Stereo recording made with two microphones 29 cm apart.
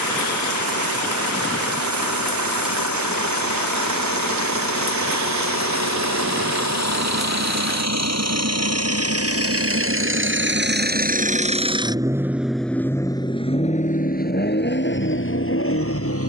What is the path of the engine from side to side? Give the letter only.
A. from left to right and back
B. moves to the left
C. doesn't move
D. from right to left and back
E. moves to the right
B.